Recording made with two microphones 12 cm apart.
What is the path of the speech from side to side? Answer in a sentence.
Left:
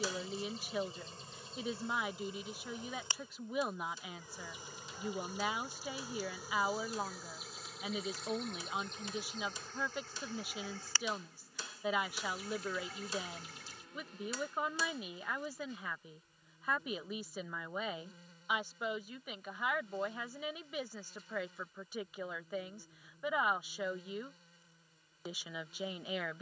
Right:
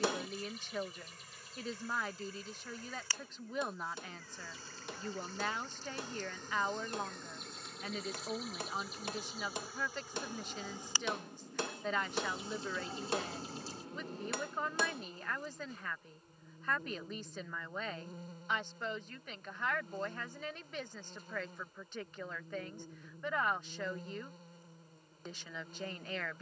You can hear the speech stay put.